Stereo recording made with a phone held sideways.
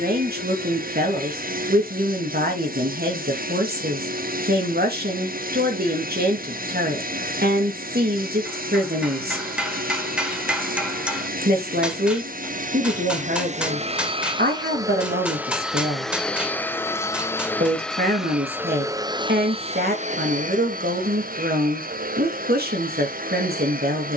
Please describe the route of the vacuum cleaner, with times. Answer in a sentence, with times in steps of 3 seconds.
You can hear the vacuum cleaner on the right from 0 s, in the centre from 15 s and on the right from 18 s.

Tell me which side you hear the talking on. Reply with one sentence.
You can hear the talking on the right.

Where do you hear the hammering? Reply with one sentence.
In this clip you hear the hammering in the centre.